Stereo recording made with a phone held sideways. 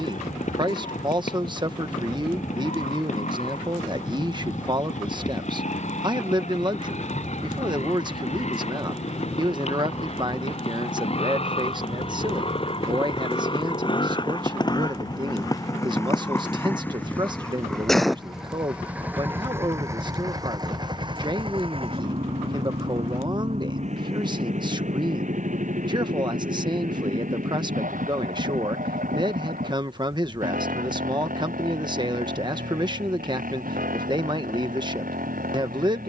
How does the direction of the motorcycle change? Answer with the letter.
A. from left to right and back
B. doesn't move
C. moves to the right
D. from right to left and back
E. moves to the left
C.